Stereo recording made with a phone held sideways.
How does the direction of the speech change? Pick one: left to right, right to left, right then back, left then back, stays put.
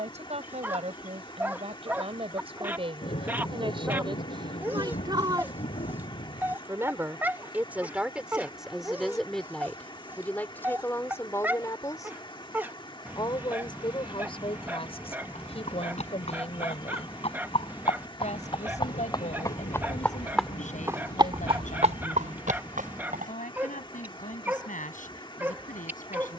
right to left.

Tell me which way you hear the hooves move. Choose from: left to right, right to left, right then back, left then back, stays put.
left to right.